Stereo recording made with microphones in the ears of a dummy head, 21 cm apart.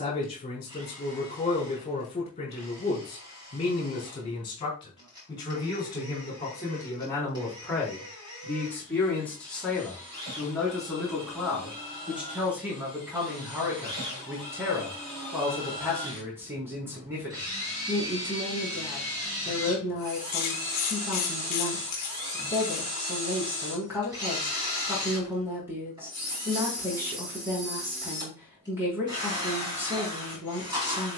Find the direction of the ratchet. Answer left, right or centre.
left.